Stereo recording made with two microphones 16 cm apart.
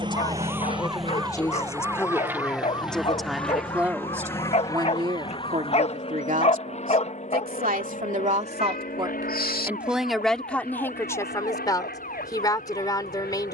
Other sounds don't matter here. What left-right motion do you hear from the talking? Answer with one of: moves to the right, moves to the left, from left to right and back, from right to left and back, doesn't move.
from left to right and back.